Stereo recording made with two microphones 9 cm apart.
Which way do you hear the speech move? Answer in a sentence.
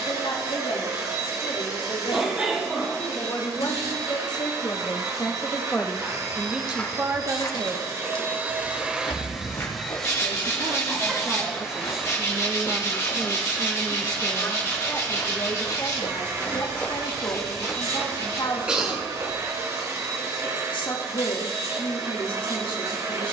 You can hear the speech move from left to right and back again.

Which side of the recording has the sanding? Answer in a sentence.
You can hear the sanding on the left.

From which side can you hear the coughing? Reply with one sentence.
In this clip you hear the coughing in the centre.